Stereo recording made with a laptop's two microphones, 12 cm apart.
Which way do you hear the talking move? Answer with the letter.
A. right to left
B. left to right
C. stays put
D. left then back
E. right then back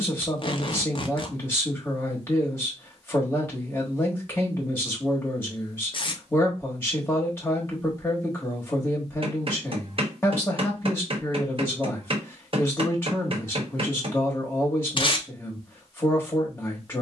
C.